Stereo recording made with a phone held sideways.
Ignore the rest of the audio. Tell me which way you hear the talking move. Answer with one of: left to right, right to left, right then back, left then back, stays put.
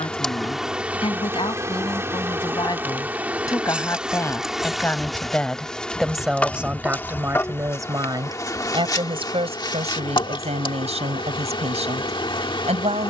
left to right.